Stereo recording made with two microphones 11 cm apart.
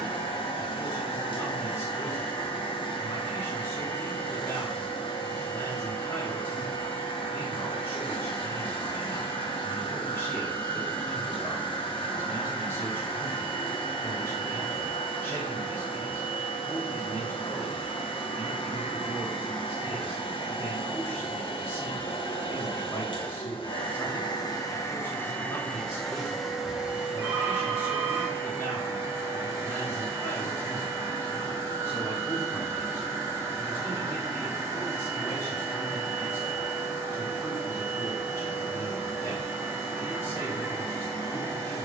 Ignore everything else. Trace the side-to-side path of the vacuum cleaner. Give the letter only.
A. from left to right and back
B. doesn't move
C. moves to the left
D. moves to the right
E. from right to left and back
D.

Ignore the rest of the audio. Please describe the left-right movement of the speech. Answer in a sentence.
In this clip you hear the speech stay in one place.